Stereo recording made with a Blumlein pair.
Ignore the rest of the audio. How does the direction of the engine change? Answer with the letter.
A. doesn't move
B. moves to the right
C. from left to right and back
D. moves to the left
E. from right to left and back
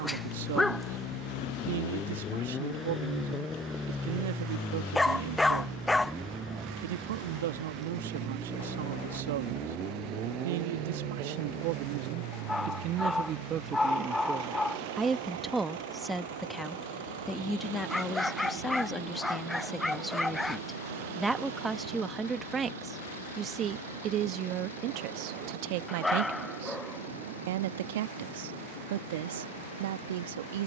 B.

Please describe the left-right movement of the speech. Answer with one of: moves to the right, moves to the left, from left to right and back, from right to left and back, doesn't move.
from right to left and back.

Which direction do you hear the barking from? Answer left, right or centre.
centre.